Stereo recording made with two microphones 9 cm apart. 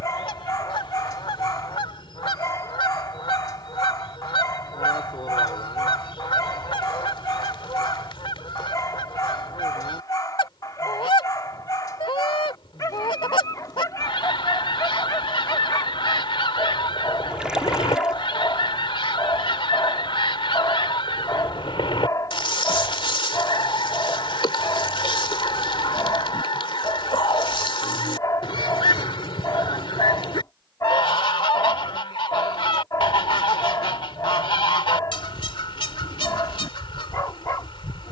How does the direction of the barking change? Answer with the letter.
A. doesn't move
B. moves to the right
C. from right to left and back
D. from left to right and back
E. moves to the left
A.